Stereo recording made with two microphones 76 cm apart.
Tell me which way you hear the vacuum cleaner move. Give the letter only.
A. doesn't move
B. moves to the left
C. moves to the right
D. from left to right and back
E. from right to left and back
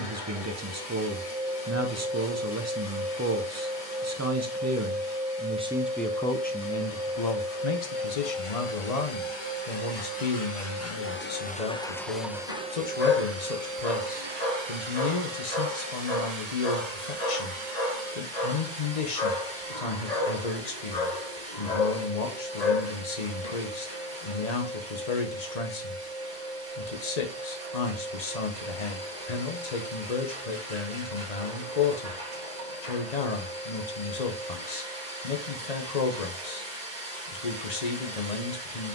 C.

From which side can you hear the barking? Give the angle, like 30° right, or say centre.
60° left.